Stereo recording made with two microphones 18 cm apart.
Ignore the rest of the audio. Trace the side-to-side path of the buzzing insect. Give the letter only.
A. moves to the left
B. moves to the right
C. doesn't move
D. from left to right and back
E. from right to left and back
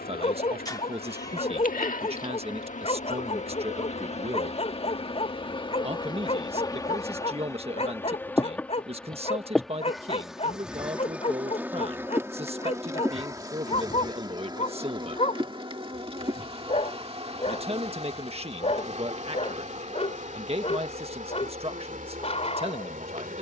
B.